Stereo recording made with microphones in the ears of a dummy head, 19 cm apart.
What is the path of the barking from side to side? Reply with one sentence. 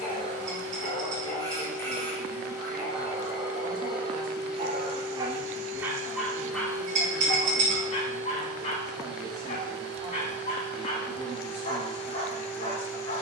In this clip you hear the barking move from left to right and back again.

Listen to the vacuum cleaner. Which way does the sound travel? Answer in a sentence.
In this clip you hear the vacuum cleaner go right and come back.